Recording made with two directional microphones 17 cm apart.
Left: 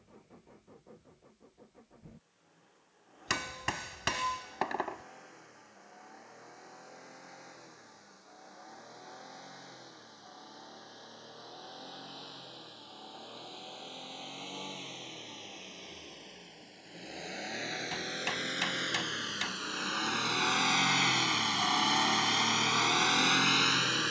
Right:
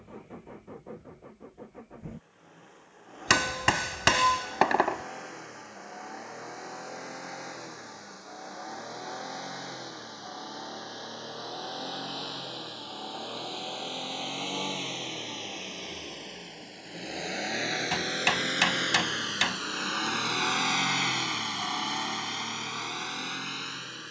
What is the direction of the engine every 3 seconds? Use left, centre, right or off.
right, right, right, right, right, right, right, left.